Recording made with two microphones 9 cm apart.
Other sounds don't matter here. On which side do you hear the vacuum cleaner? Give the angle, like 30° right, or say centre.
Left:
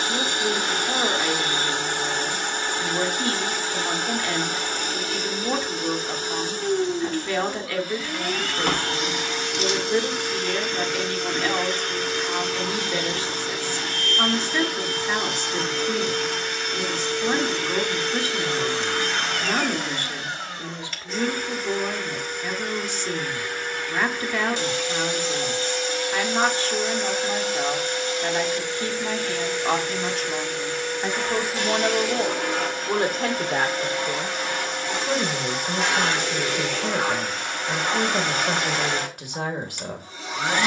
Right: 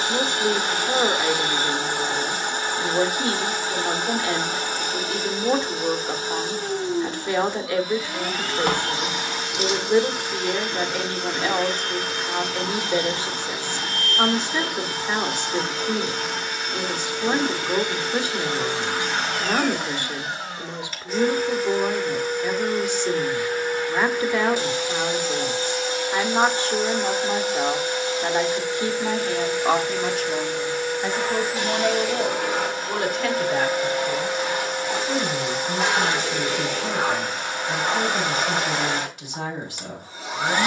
10° right.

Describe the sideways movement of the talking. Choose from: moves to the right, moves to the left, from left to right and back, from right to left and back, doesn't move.
moves to the left.